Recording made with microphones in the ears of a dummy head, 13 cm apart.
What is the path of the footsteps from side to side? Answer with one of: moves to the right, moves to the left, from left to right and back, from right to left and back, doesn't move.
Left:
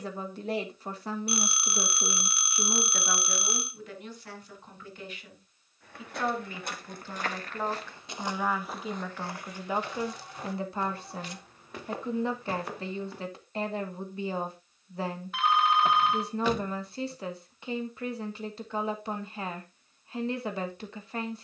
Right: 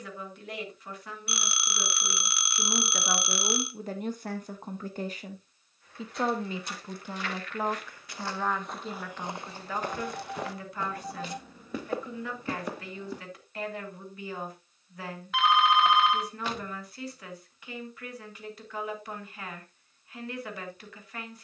moves to the right.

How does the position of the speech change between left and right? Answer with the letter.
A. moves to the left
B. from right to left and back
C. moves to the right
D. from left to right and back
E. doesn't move
D.